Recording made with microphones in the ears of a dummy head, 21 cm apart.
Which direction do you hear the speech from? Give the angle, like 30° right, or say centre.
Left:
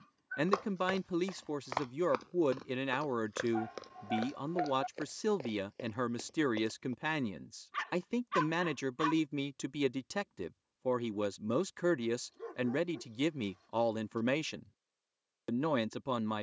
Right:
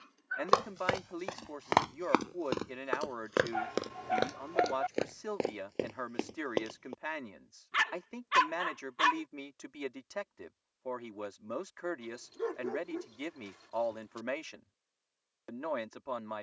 50° left.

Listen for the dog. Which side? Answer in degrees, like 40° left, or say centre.
70° right.